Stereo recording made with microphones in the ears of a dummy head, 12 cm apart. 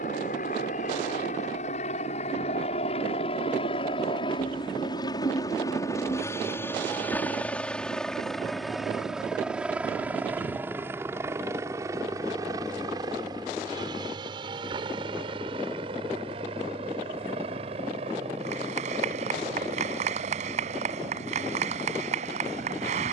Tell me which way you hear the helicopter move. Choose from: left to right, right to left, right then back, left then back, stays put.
left to right.